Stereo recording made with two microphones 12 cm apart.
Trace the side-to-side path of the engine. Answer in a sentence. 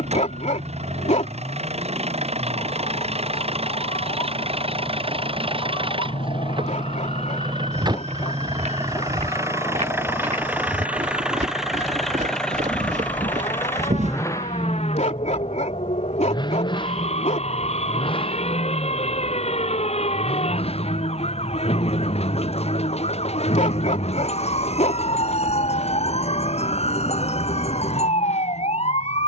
You can hear the engine move to the left.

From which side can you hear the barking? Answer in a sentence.
You can hear the barking on the left.